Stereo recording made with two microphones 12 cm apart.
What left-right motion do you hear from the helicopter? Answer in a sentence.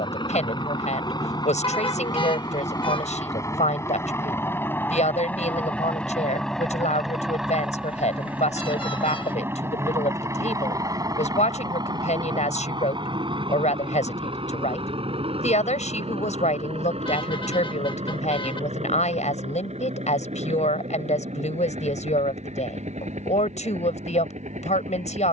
In this clip you hear the helicopter travel towards the right.